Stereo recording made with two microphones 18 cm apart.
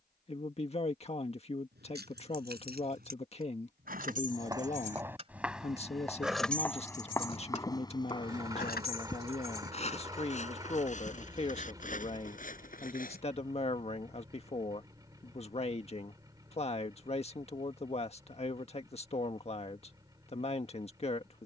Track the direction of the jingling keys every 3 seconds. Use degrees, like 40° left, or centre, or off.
60° right, 50° right, 30° left, 70° left, off, off, off.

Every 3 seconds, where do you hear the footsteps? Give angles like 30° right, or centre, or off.
off, 10° right, 20° left, 40° left, 50° left, off, off.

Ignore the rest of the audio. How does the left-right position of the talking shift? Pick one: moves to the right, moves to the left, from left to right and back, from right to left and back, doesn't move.
doesn't move.